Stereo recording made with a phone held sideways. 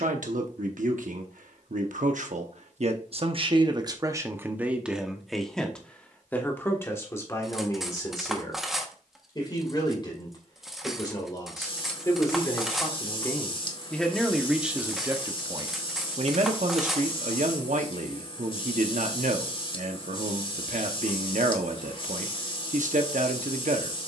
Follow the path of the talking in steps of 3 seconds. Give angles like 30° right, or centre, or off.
70° right, 20° right, 20° left, 30° left, 10° left, 50° right, 70° right, 70° right.